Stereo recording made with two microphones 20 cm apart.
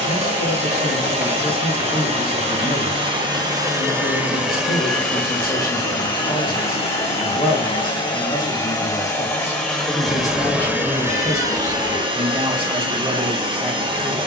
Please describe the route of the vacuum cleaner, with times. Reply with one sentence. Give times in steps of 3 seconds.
You can hear the vacuum cleaner on the right from 0 s, in the centre from 3 s, on the left from 6 s, in the centre from 9 s and on the right from 12 s.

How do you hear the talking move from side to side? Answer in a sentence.
You can hear the talking move from left to right.